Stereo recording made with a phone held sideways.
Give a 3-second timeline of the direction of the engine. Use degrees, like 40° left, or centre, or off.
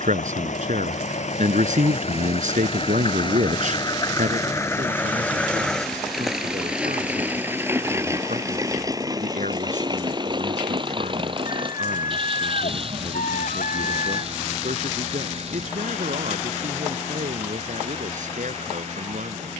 60° left, 20° left, 10° right, 40° right, 50° right, 50° right, 50° right.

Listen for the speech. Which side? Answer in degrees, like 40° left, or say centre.
70° right.